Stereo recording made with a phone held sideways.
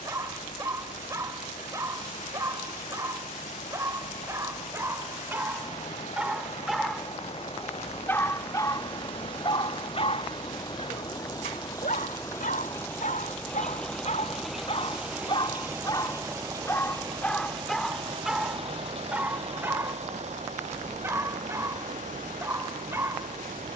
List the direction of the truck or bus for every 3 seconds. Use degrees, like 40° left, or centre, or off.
60° left, 50° left, 50° left, 30° left, 10° left, 20° right, 50° right, 60° right.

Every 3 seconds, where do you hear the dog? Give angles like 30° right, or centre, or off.
20° right, 20° right, 10° left, 50° left, 60° left, 20° left, 10° right, 20° right.